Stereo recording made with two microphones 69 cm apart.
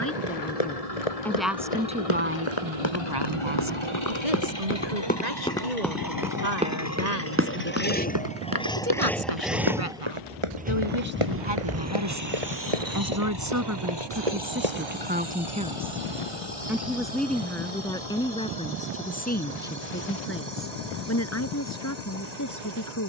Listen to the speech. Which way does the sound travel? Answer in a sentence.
You can hear the speech move from left to right and back again.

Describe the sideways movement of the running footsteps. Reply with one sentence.
In this clip you hear the running footsteps move to the right.